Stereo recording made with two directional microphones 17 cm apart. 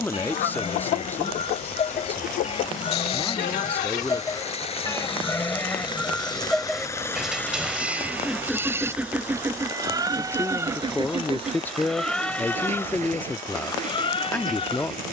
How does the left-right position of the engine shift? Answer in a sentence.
You can hear the engine move from left to right.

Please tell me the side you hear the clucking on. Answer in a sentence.
You can hear the clucking on the left.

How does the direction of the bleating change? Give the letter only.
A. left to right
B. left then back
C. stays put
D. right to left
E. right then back
E.